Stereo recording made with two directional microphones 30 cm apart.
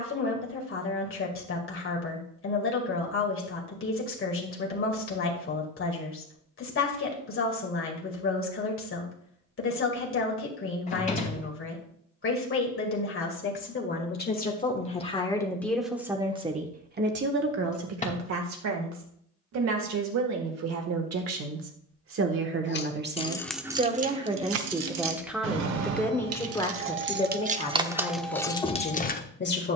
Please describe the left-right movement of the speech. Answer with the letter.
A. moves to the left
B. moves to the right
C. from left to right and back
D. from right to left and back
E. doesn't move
C.